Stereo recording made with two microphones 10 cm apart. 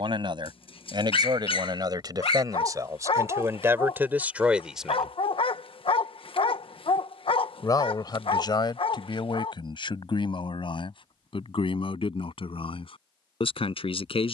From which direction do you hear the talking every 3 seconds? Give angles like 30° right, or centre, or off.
50° right, 20° right, 50° left, 60° left, 70° left.